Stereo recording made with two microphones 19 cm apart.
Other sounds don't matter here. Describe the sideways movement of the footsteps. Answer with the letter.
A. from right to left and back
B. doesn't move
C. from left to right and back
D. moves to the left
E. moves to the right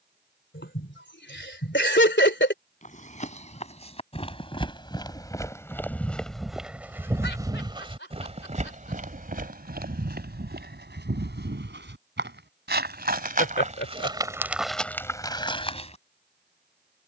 C.